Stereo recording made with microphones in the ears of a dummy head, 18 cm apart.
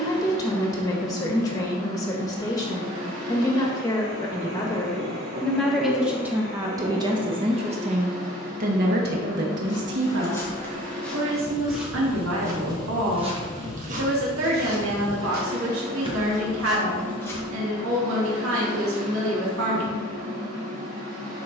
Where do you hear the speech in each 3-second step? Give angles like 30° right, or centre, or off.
20° left, 10° left, 30° right, 60° right, 70° right, 70° right, 70° right.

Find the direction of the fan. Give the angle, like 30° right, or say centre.
70° right.